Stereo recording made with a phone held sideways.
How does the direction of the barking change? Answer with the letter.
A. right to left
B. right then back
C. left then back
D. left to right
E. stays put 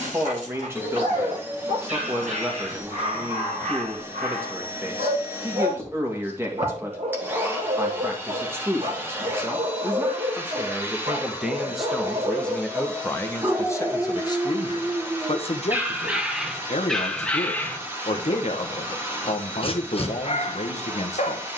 A.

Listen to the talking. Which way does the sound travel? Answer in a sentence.
In this clip you hear the talking move to the left.